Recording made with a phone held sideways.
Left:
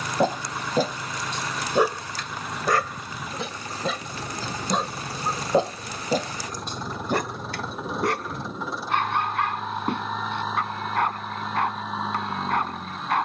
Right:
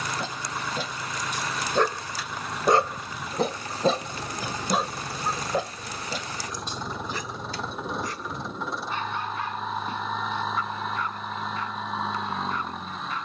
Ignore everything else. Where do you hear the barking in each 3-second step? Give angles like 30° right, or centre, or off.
20° left, 10° right, 60° left, 70° left, 70° left.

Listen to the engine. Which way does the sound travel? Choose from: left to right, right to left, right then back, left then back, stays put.
stays put.